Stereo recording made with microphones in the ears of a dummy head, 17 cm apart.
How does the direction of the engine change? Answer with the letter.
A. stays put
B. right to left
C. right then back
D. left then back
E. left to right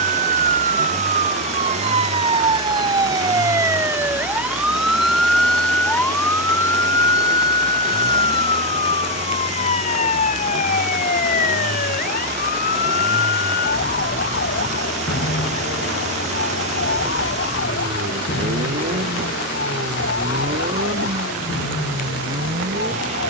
A.